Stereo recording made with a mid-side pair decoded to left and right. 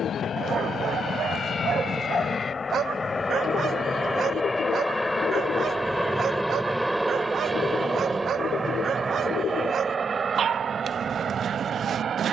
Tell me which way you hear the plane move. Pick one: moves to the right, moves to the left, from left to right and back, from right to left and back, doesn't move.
moves to the right.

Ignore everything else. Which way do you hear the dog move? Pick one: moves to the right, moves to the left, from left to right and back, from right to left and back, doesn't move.
doesn't move.